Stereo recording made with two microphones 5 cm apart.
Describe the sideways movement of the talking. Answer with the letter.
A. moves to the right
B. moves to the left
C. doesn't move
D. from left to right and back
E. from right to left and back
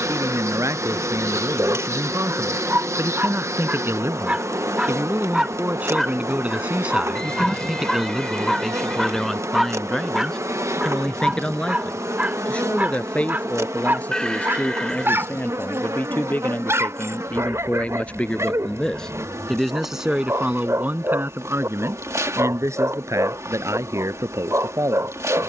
E.